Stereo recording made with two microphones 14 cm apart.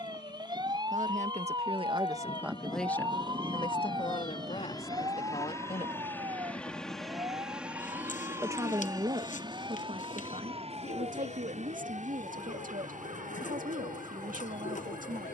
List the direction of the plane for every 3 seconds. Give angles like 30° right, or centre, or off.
50° left, 30° left, 10° right, 40° right, 60° right.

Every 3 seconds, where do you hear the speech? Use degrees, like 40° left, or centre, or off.
30° right, 40° left, 20° right, 60° right, 70° right.